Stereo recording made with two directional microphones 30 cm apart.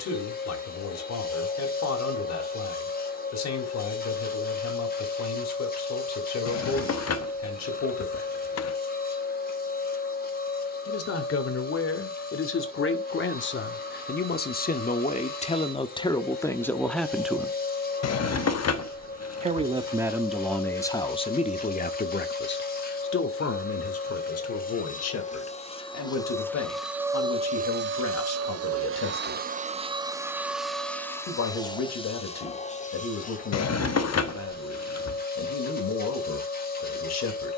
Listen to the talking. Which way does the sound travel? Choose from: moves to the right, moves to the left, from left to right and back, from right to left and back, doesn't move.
from left to right and back.